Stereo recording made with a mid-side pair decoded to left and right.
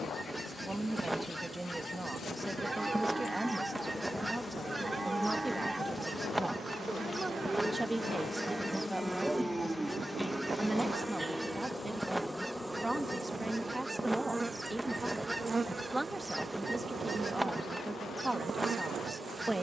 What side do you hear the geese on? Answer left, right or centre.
centre.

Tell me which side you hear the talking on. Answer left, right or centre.
centre.